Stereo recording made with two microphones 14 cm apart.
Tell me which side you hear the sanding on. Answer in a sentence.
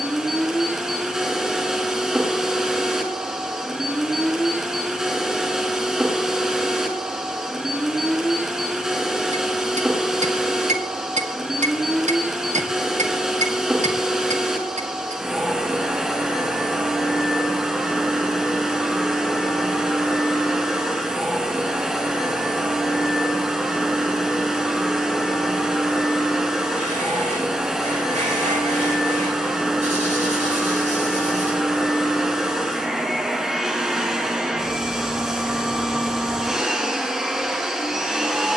You can hear the sanding on the right.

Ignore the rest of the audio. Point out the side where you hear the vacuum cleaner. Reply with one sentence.
You can hear the vacuum cleaner in the centre.